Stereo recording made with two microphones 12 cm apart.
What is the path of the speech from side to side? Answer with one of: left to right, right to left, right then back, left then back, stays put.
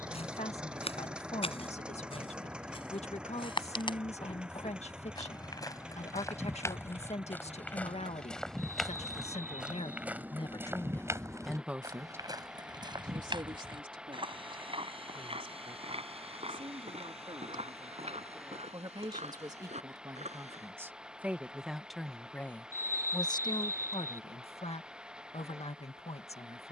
right then back.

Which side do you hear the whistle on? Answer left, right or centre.
right.